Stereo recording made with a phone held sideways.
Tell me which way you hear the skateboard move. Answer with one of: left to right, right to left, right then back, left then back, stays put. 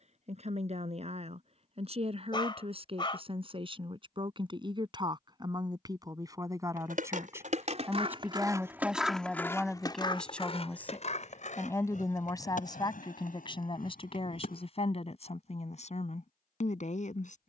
right to left.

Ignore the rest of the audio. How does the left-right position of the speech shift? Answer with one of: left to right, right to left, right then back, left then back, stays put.
right to left.